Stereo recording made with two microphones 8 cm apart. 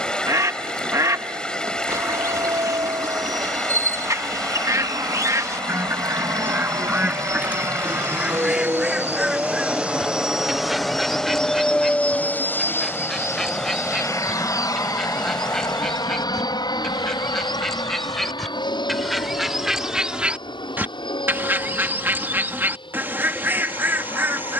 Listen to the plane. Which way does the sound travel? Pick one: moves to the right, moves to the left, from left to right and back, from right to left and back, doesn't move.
moves to the left.